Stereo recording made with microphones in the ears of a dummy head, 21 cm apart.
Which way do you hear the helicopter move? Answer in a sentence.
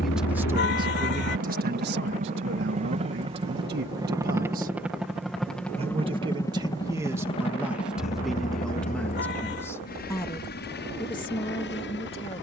In this clip you hear the helicopter move to the left.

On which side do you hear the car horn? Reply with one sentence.
You can hear the car horn on the left.